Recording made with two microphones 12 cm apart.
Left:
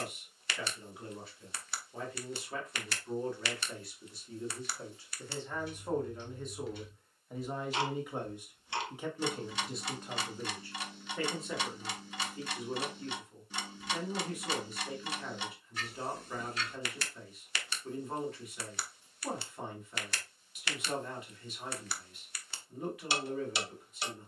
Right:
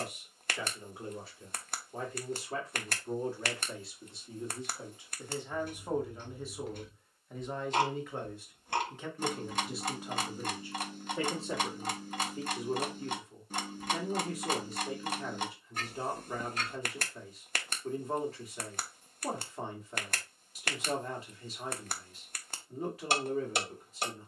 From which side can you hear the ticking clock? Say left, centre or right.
right.